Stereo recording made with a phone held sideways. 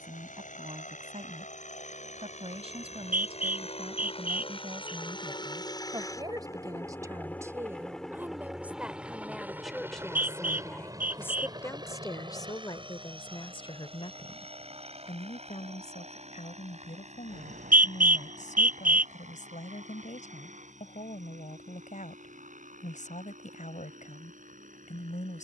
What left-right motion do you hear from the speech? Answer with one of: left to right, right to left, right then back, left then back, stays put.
right to left.